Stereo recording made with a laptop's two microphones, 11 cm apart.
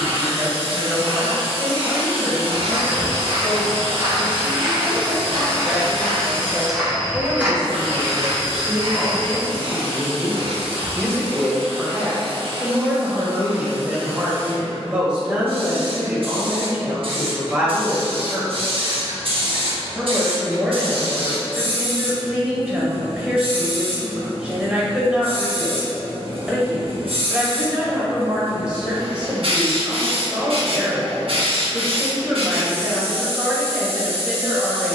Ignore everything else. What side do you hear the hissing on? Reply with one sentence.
In this clip you hear the hissing on the right.